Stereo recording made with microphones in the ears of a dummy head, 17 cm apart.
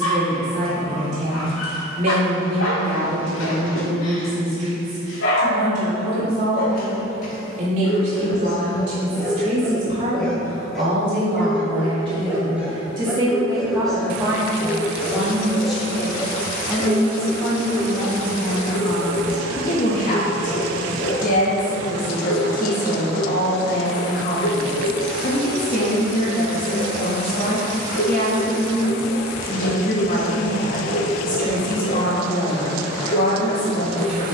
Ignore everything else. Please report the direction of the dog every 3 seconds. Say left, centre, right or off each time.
left, left, left, centre, centre, left, left, left, left, left, left, left.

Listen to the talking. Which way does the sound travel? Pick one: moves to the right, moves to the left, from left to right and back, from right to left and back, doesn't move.
moves to the left.